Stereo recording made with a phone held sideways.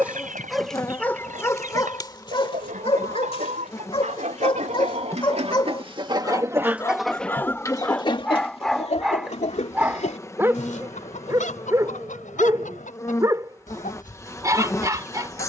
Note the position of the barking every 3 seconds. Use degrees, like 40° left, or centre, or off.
20° left, 40° left, 10° left, 20° right, 20° right.